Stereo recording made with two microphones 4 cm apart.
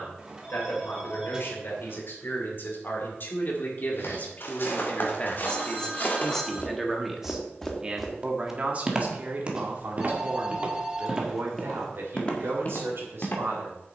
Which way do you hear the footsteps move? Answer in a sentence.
In this clip you hear the footsteps move from left to right and back again.